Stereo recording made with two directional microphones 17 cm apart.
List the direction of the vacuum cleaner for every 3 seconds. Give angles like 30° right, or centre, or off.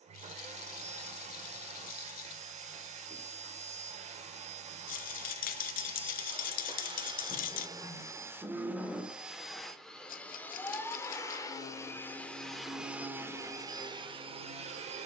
40° right, 40° right, 20° right, 10° left, 20° right.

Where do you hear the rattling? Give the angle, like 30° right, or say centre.
60° left.